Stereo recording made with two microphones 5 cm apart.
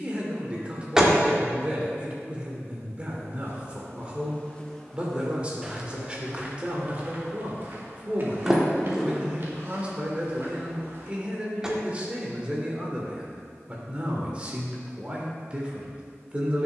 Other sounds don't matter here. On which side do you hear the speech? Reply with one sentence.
In this clip you hear the speech on the right.